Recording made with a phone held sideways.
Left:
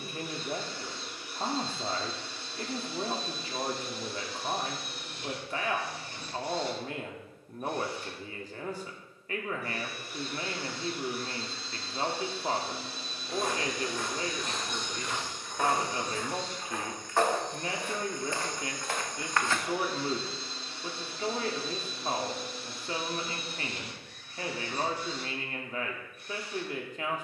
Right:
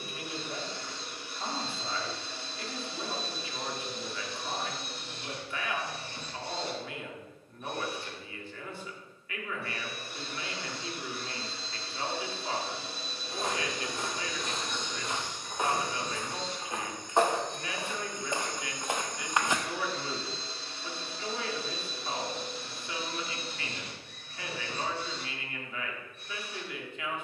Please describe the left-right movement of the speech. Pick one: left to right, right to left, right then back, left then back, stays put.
stays put.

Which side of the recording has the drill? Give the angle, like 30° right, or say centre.
30° right.